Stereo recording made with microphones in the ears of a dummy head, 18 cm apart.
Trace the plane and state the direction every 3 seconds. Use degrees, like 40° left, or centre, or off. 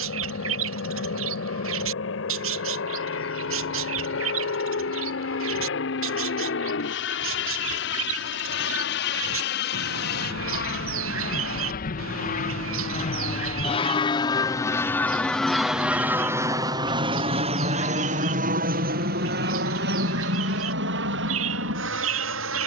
80° left, 70° left, 70° left, 60° left, 30° left, 10° right, 50° right, 60° right.